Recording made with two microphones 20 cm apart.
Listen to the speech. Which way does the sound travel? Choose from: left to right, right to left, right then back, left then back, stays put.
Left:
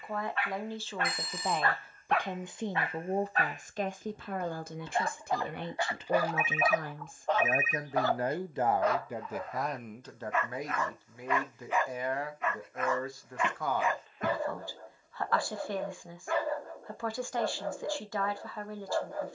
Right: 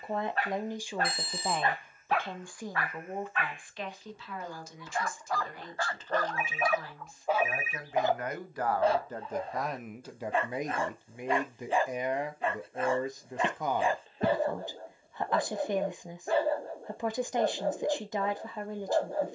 left then back.